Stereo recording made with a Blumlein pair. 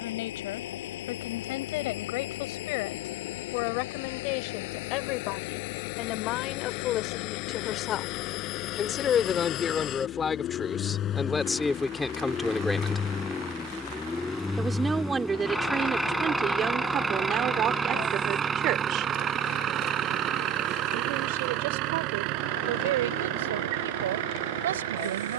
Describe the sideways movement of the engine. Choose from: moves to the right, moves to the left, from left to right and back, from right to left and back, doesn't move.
moves to the right.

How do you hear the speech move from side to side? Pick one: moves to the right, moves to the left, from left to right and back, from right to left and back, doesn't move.
moves to the right.